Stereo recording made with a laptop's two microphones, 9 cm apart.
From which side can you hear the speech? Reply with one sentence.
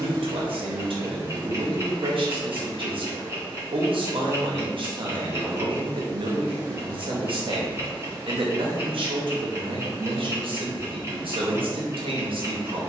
You can hear the speech on the right.